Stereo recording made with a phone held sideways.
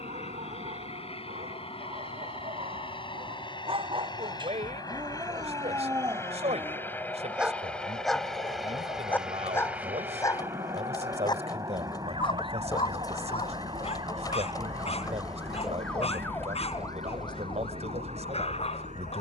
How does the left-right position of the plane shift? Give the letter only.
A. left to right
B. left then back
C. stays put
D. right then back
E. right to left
A.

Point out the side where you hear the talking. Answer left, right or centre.
right.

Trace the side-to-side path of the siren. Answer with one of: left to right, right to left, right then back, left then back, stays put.
right to left.